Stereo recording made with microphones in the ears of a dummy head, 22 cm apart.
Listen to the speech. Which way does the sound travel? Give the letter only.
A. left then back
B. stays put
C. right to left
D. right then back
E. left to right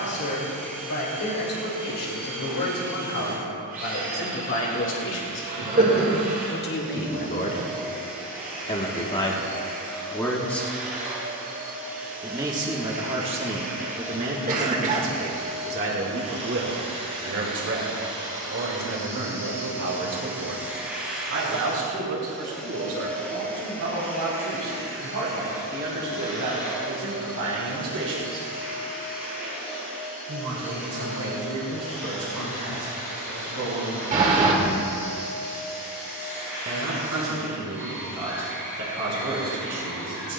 E.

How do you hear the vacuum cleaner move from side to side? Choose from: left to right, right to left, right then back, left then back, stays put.
right to left.